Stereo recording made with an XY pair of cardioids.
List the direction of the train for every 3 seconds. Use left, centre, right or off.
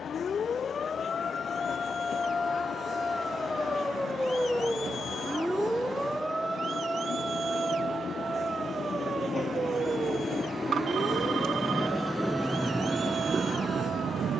left, left, left, left, right.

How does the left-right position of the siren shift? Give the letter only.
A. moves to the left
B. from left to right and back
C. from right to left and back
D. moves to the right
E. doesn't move
D.